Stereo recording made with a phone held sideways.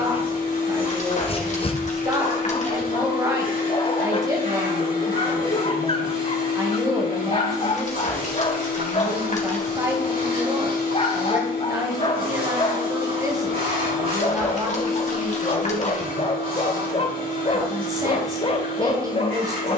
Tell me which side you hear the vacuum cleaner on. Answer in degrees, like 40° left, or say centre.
70° right.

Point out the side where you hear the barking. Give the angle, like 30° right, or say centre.
40° left.